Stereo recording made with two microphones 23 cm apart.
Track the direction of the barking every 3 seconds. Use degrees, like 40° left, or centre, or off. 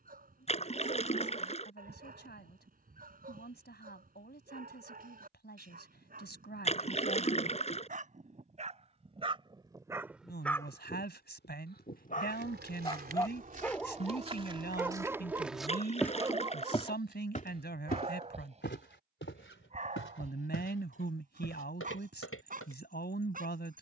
40° right, 40° right, 40° right, centre, 10° left, 20° right, 30° right, 40° right.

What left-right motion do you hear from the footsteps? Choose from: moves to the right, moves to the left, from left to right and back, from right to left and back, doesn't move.
moves to the left.